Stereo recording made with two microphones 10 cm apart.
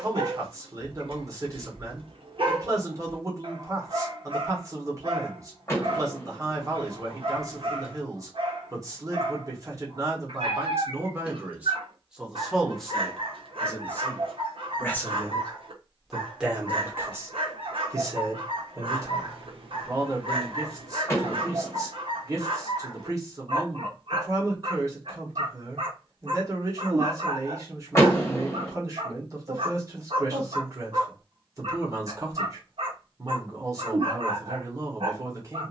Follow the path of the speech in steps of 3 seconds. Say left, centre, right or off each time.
right, right, right, right, centre, centre, right, right, right, right, right, right.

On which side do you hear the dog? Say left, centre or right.
right.